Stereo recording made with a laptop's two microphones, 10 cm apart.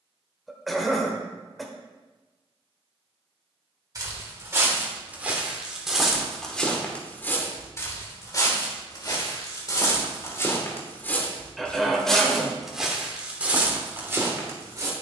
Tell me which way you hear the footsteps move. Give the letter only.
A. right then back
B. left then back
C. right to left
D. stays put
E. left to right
B.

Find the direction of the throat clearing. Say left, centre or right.
centre.